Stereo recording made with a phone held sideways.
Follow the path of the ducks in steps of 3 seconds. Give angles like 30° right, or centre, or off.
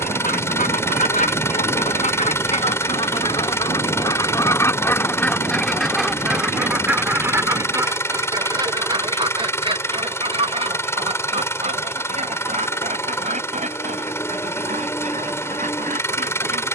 50° left, 20° left, 20° right, 40° right, 50° right, 50° right.